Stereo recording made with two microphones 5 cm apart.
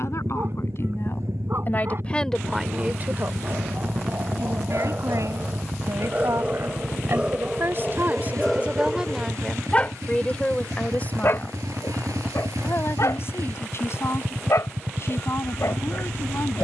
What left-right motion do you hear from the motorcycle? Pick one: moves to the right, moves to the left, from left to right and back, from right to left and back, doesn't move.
doesn't move.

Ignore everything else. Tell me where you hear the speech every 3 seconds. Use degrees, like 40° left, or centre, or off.
30° left, 70° right, 50° right, 20° left, 50° left, 50° left.